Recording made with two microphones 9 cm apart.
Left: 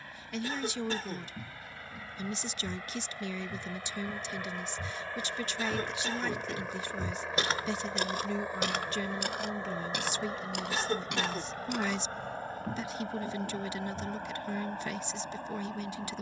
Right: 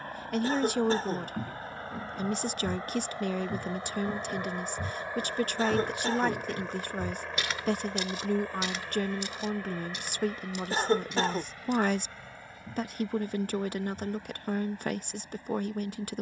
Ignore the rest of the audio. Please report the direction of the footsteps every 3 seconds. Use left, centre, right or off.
right, right, left, left, left, off.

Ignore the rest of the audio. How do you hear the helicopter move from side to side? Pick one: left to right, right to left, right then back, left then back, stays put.
right to left.